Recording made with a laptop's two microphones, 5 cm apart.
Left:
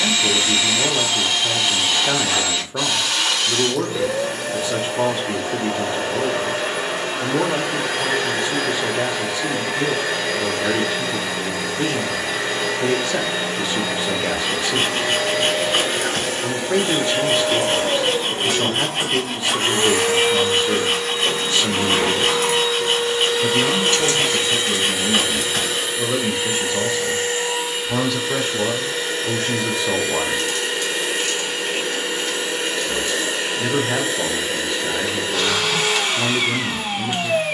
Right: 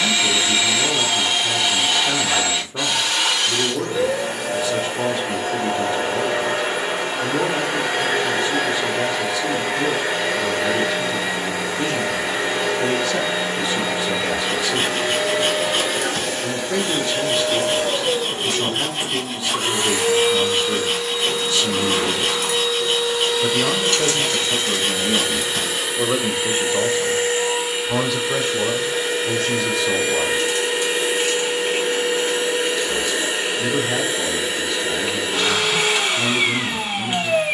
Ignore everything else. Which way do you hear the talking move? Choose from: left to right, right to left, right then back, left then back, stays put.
right then back.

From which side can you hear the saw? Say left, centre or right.
left.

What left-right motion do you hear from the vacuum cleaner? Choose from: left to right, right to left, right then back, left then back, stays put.
left then back.